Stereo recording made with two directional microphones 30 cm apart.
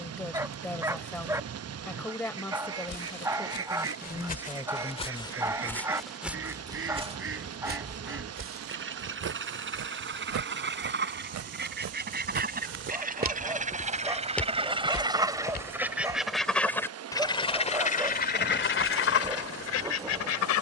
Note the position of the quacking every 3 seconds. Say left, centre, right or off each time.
right, right, right, right, right, centre, left.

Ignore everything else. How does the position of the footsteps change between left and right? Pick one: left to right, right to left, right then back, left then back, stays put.
right then back.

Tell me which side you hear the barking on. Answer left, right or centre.
centre.